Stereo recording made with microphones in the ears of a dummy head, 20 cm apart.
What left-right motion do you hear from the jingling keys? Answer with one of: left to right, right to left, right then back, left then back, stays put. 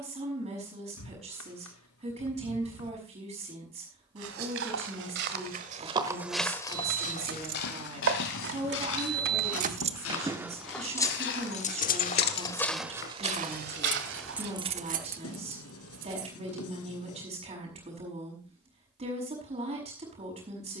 left then back.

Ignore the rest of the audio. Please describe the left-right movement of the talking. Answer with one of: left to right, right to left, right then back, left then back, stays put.
stays put.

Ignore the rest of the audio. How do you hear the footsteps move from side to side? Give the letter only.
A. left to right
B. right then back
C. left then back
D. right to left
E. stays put
C.